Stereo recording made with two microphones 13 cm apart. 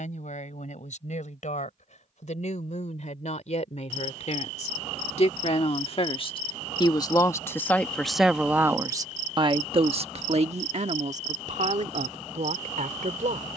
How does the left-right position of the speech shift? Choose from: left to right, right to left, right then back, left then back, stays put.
left to right.